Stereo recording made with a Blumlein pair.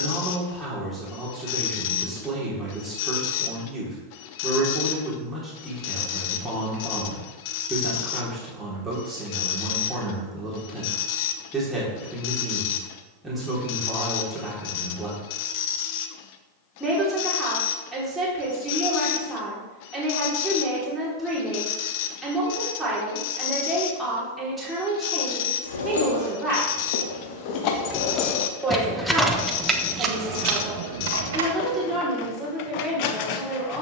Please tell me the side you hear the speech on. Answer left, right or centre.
centre.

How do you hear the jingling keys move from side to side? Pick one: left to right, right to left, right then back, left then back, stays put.
left to right.